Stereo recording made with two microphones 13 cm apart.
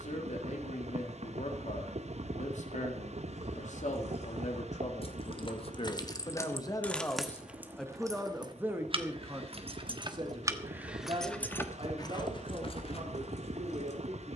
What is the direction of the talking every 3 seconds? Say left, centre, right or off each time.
left, left, centre, right, right.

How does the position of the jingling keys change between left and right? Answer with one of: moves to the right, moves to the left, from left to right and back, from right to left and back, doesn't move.
from left to right and back.